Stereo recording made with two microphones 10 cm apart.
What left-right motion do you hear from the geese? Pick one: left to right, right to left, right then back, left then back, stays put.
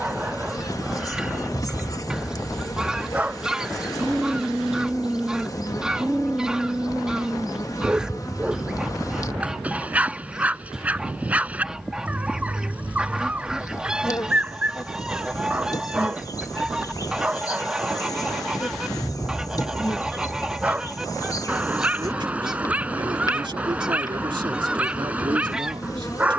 stays put.